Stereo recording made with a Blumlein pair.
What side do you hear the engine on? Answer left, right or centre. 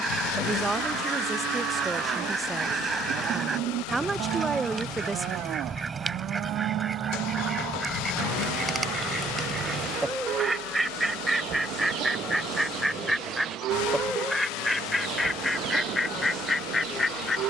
left.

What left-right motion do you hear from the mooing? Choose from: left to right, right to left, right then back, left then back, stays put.
stays put.